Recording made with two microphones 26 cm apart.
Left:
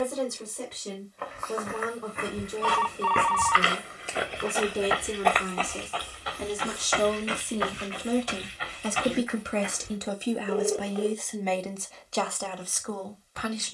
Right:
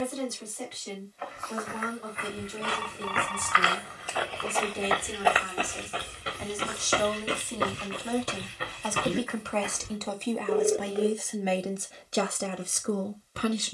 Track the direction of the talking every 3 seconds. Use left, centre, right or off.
left, left, left, centre, right.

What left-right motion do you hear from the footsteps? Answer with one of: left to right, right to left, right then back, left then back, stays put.
left to right.